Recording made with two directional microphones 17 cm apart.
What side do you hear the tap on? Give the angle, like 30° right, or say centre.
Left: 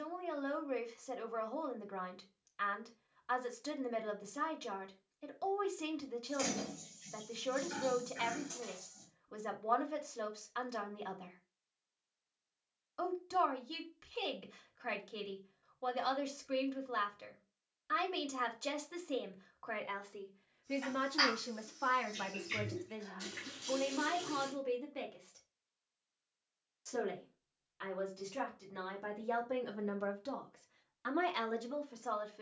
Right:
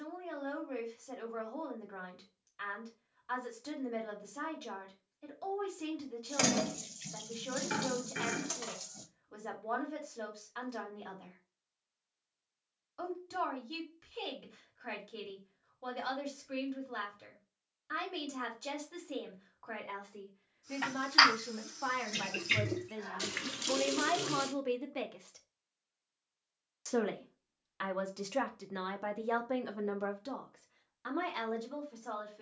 60° right.